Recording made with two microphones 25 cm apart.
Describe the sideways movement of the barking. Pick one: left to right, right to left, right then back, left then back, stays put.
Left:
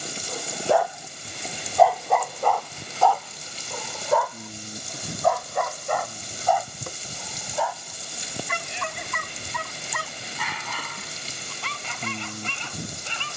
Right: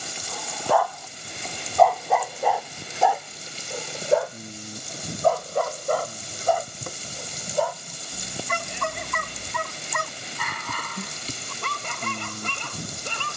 left to right.